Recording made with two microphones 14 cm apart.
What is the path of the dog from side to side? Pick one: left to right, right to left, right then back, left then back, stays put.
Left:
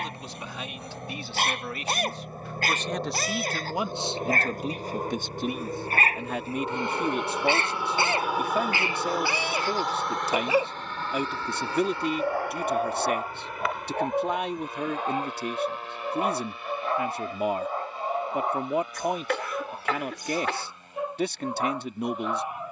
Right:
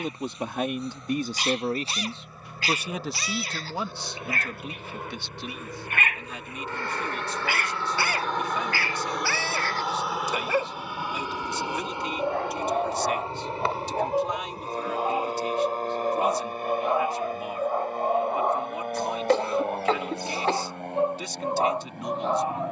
left to right.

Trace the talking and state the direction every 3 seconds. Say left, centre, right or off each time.
right, left, left, left, left, left, left, left.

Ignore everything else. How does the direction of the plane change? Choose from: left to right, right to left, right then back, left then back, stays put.
left to right.